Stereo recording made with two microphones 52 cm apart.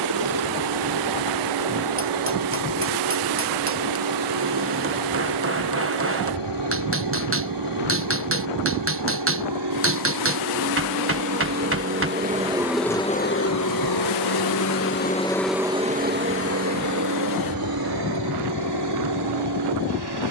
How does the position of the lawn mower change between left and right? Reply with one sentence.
You can hear the lawn mower go left and come back.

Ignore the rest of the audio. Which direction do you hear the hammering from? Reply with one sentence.
In this clip you hear the hammering on the right.